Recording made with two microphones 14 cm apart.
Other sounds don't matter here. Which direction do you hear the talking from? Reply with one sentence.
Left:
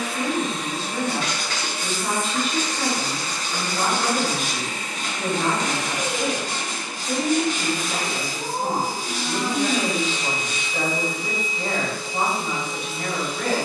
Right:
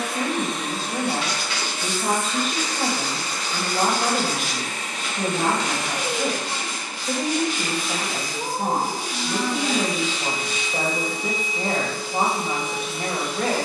In this clip you hear the talking on the right.